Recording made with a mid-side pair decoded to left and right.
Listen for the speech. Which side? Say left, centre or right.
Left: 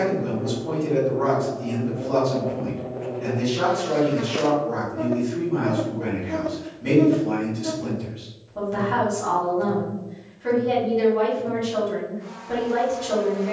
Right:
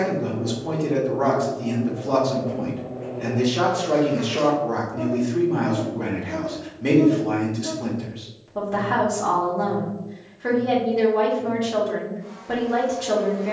right.